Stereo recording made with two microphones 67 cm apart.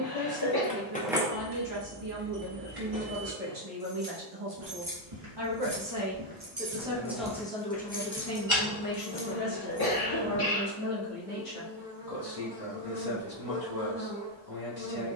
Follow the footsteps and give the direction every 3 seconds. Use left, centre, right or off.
off, right, centre, left, off.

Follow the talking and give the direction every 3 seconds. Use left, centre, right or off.
right, right, centre, left, left.